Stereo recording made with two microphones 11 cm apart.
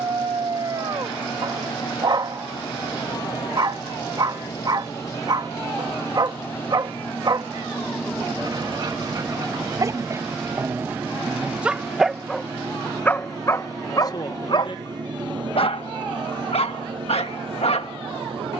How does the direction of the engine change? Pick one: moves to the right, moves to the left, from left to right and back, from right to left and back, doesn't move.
moves to the right.